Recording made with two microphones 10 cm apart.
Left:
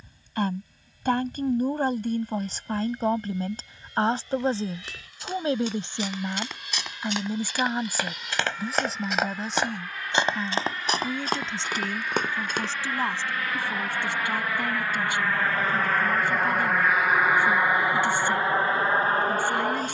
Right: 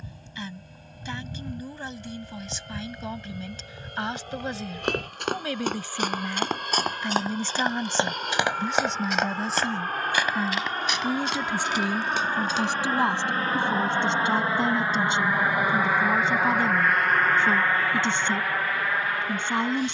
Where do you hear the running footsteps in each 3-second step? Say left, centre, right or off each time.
off, right, right, left, left, off, off.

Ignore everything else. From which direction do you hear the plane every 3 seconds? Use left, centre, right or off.
right, right, right, right, right, centre, left.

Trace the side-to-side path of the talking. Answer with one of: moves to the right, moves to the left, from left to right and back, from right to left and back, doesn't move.
moves to the right.